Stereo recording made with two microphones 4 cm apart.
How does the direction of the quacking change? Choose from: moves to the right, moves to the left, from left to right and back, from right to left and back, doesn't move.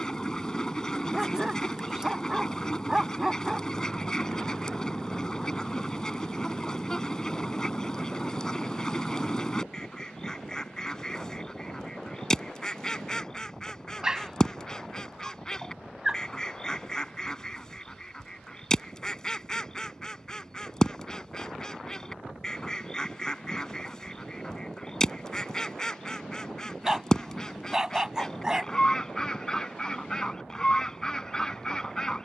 doesn't move.